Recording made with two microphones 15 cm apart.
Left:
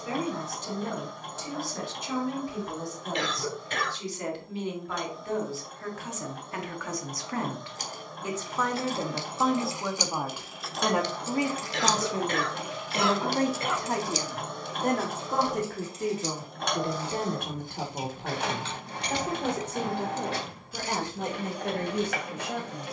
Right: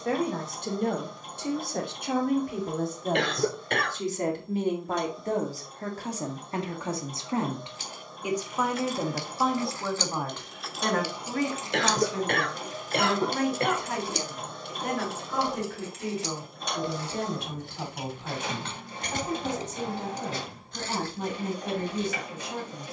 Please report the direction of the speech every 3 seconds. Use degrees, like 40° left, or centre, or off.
60° right, 40° right, 20° right, 10° left, 40° left, 50° left, 60° left, 70° left.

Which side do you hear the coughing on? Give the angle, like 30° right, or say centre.
60° right.